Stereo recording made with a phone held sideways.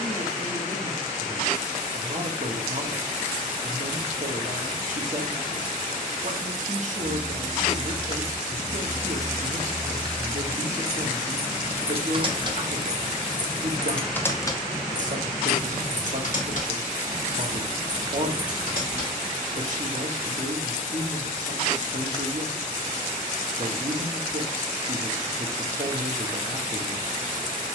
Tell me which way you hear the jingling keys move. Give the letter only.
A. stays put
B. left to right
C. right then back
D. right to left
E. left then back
C.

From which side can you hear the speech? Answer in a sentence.
You can hear the speech on the right.